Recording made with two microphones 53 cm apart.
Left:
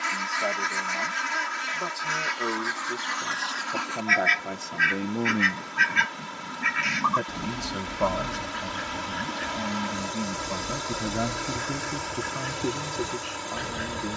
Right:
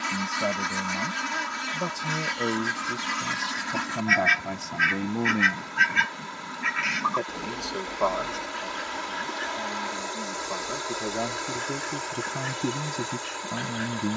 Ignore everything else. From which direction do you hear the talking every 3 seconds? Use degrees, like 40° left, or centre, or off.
50° right, 20° right, 40° left, 40° left, 30° right.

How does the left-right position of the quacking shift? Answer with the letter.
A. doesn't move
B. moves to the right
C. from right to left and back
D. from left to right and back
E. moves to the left
E.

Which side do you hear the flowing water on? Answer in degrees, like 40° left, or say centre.
50° left.